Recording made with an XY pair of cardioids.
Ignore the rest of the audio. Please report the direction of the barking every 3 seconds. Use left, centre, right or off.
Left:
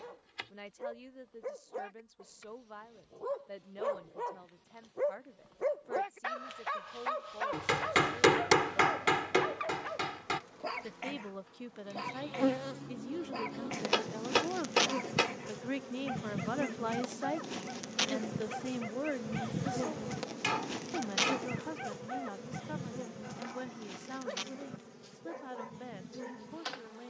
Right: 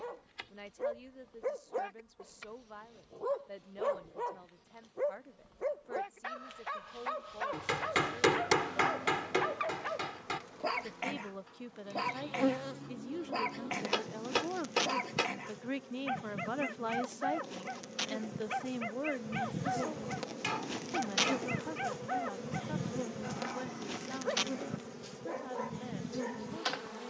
right, centre, centre, right, right, right, right, right, right.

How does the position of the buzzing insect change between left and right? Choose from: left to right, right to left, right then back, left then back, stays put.
left then back.